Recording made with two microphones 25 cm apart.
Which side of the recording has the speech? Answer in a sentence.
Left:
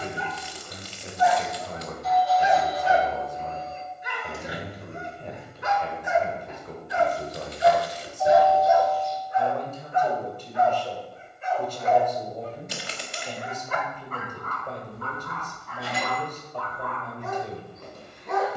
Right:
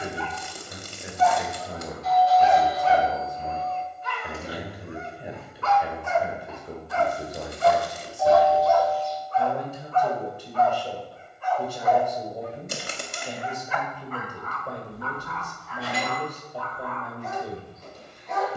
You can hear the speech in the centre.